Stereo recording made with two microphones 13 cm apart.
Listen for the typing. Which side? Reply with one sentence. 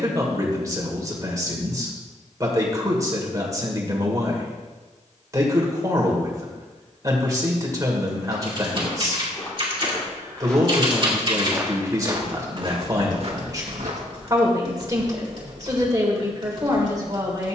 In this clip you hear the typing on the right.